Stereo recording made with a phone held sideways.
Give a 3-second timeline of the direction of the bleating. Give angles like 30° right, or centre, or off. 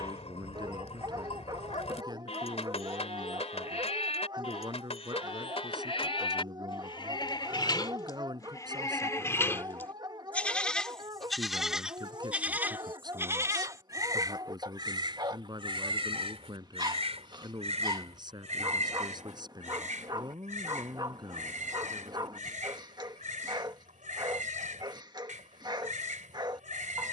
40° left, 40° left, 30° left, 10° left, 20° right, 40° right, 50° right, 60° right, 60° right.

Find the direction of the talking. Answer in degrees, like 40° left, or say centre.
30° right.